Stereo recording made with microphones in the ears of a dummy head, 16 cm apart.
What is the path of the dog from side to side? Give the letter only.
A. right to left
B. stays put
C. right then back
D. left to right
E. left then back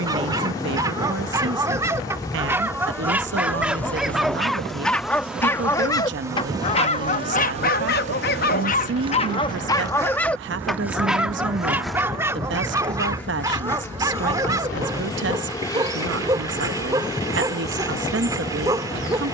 E.